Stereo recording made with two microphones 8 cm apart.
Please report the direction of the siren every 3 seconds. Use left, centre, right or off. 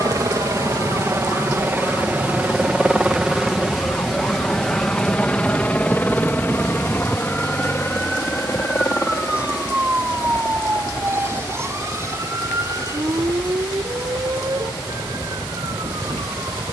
left, left, centre, right, right, right.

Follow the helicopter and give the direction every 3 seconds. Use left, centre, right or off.
right, centre, left, left, left, left.